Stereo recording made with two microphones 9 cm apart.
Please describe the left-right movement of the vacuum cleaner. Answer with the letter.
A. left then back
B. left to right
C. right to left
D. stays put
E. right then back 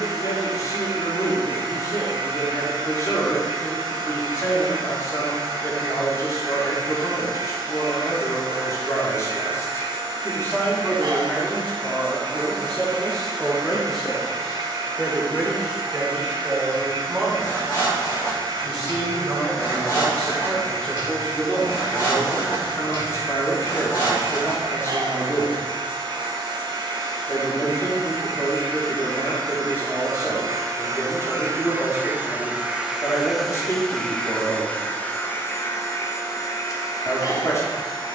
C.